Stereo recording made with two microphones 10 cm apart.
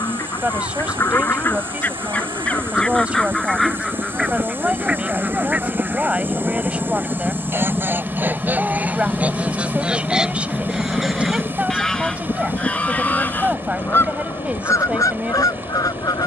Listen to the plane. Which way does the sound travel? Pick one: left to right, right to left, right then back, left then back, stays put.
right to left.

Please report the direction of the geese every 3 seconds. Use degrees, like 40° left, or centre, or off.
20° left, 10° right, 20° right, 10° right, 20° left, 40° left.